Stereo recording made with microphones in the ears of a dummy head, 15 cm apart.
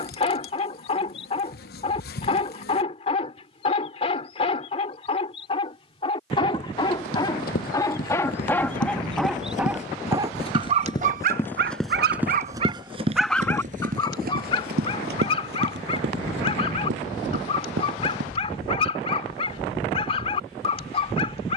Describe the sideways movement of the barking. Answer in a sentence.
You can hear the barking move from left to right and back again.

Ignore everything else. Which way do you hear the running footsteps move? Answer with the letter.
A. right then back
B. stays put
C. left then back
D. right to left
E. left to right
E.